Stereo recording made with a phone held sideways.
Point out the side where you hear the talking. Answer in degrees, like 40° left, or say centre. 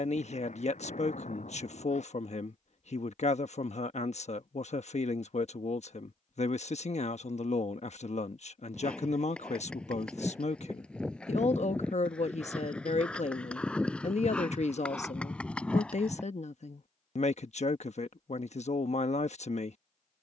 60° left.